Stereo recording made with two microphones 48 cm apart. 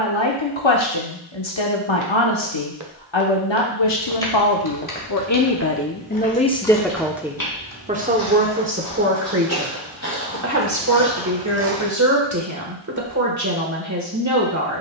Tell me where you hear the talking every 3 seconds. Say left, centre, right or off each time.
left, left, centre, right, right.